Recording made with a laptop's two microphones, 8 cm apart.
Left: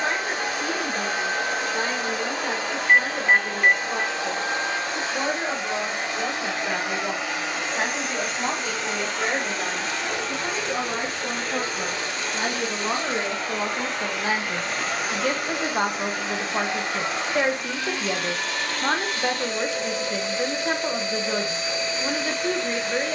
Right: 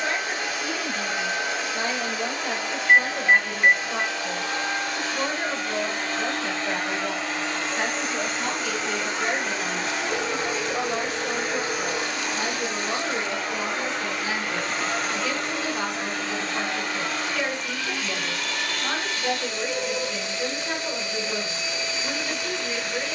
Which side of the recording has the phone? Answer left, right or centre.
centre.